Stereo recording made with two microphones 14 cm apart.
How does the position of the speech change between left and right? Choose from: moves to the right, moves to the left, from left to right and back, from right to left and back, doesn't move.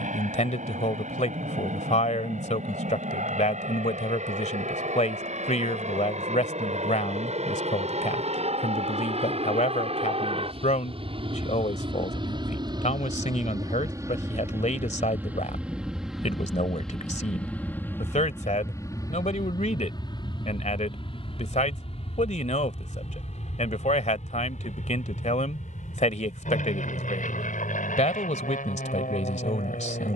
doesn't move.